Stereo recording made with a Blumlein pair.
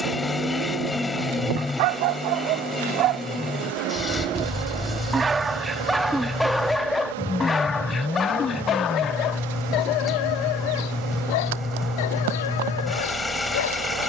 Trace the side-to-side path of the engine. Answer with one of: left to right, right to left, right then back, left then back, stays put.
stays put.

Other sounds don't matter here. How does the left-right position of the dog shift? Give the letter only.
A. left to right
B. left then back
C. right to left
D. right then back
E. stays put
C.